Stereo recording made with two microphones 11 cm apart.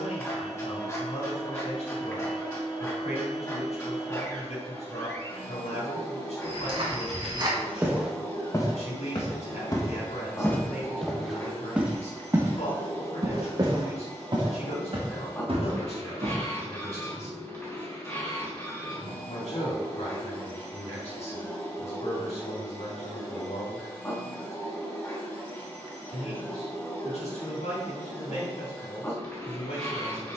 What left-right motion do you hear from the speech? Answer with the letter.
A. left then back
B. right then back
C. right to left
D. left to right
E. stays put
E.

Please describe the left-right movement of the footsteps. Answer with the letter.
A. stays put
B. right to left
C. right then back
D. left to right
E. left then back
E.